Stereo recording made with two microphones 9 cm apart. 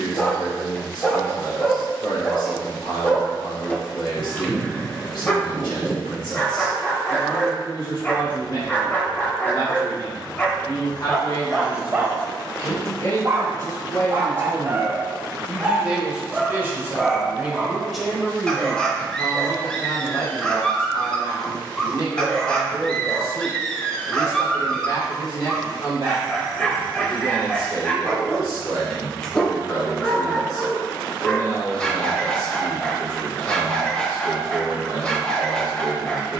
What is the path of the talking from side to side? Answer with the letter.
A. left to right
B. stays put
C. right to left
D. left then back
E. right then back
E.